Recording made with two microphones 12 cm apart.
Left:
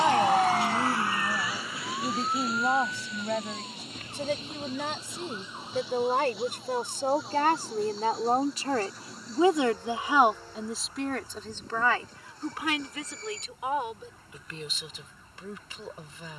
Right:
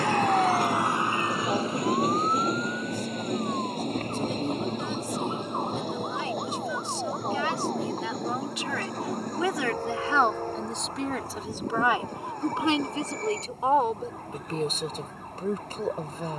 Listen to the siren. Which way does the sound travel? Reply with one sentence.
You can hear the siren move from left to right.